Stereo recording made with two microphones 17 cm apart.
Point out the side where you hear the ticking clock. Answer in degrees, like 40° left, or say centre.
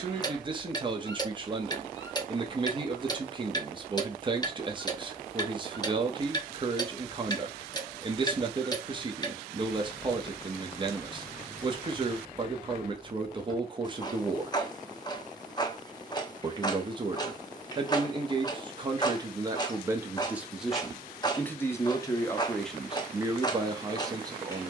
20° left.